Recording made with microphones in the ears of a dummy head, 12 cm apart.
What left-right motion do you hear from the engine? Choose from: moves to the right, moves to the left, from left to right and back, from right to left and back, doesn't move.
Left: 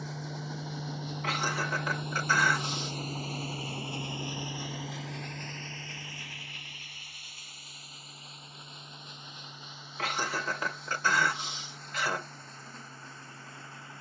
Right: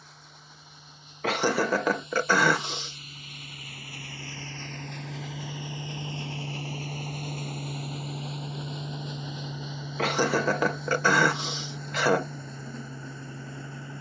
moves to the right.